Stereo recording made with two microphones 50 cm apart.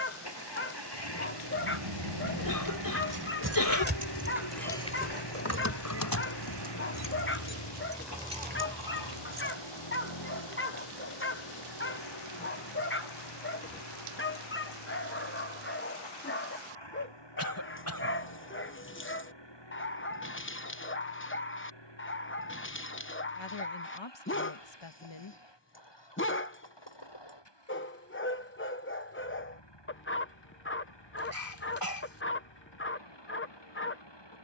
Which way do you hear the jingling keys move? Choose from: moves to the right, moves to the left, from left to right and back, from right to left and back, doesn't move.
from right to left and back.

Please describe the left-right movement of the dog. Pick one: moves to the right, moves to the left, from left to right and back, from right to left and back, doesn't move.
doesn't move.